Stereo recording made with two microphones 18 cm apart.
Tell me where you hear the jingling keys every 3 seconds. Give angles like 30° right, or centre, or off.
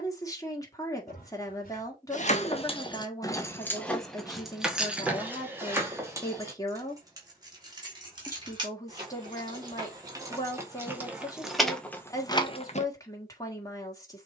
40° left, centre, 20° right, 10° right, 30° left.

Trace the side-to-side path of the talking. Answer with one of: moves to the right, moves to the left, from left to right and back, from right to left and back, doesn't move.
doesn't move.